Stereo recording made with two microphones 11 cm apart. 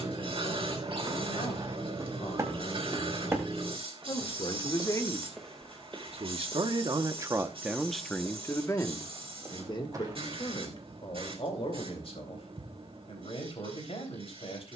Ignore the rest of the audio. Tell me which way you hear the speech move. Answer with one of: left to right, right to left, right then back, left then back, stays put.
right then back.